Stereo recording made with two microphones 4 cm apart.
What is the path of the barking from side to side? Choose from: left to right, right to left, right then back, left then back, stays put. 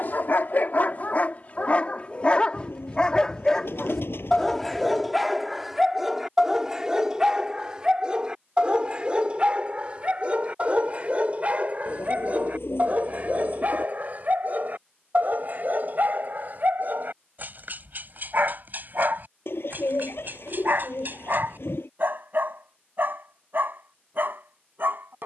left to right.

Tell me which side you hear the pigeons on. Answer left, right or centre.
left.